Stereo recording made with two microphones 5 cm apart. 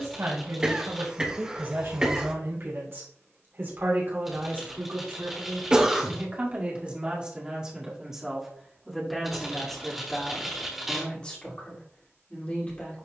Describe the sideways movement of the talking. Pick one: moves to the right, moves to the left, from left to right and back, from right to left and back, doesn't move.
moves to the left.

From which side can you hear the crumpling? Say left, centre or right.
centre.